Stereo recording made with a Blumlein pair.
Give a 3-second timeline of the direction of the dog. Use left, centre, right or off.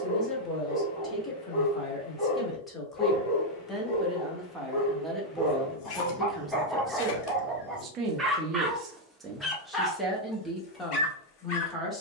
left, left, centre, left.